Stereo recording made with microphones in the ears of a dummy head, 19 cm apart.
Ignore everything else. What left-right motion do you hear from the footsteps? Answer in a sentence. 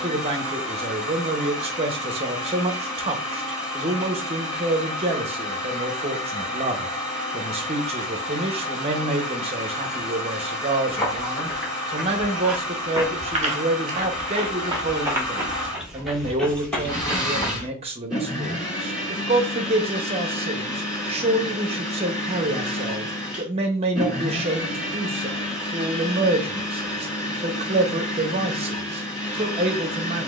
In this clip you hear the footsteps go right and come back.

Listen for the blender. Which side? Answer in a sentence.
In this clip you hear the blender in the centre.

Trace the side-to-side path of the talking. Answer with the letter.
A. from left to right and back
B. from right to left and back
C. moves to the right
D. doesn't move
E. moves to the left
D.